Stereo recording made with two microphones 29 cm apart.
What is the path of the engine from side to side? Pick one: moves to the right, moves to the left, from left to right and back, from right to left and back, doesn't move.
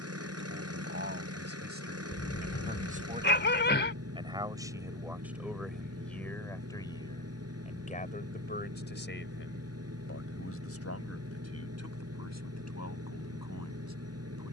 doesn't move.